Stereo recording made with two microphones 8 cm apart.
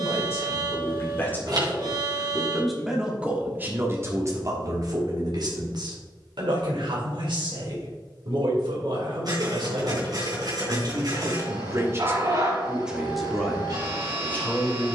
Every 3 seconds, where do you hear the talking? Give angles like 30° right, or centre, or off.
20° left, 40° right, 70° right, 60° right, centre.